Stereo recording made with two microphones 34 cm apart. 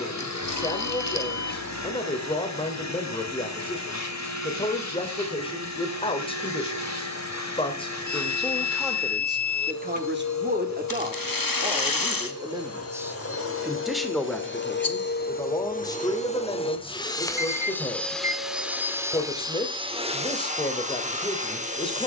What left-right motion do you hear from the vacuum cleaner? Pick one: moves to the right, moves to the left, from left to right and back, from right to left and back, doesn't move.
moves to the right.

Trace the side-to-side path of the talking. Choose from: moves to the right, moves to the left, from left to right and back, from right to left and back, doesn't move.
from left to right and back.